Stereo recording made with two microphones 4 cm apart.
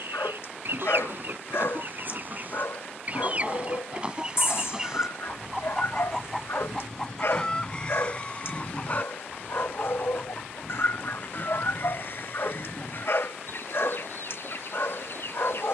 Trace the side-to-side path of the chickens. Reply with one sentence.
You can hear the chickens go from the right side to the left.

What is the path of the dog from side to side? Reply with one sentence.
You can hear the dog stay put.